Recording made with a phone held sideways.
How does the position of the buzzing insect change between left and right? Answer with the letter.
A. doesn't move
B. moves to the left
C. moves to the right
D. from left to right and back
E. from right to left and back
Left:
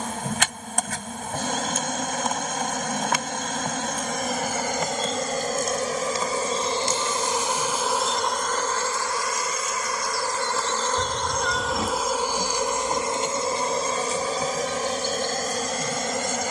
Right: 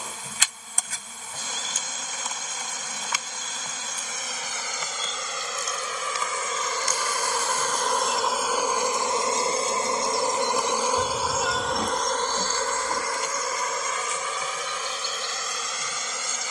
D.